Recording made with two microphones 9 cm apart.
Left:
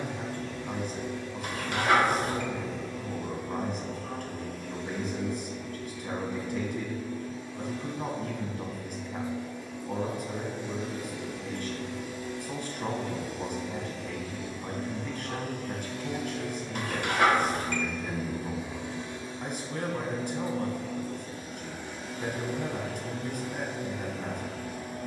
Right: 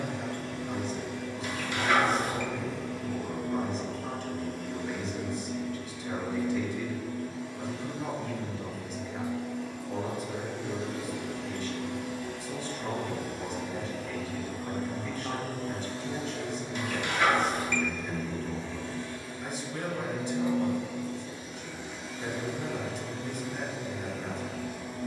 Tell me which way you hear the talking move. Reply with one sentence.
In this clip you hear the talking stay put.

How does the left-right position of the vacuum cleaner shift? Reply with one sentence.
In this clip you hear the vacuum cleaner travel towards the left.